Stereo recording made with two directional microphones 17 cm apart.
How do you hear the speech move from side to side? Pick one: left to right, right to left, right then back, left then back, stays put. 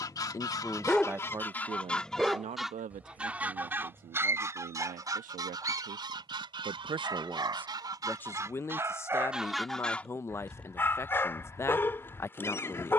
right then back.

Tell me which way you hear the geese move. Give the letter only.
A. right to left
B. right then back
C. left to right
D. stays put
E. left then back
B.